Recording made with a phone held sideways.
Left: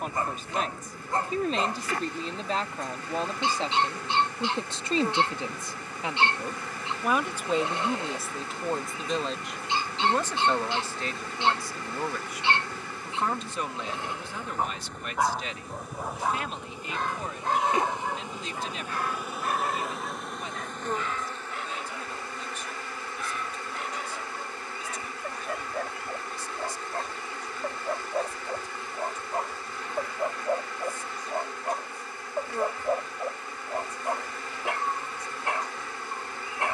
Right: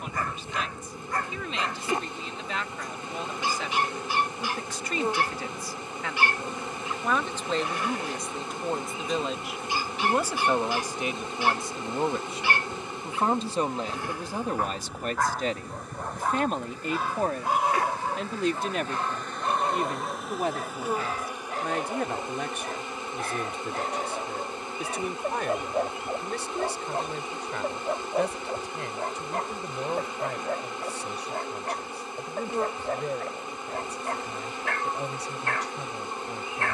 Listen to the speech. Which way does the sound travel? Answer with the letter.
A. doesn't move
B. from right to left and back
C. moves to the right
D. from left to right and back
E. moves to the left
C.